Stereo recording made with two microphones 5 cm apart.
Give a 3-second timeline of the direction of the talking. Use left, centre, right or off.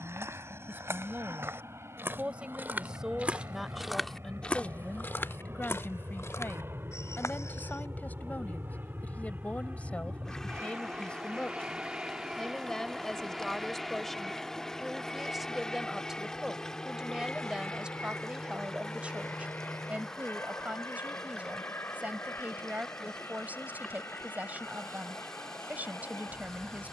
right, centre, left, left, centre, centre, right, right, right.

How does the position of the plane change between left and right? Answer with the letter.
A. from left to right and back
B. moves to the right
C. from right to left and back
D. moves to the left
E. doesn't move
D.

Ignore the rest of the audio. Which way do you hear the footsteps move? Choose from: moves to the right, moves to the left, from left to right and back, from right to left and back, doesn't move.
moves to the left.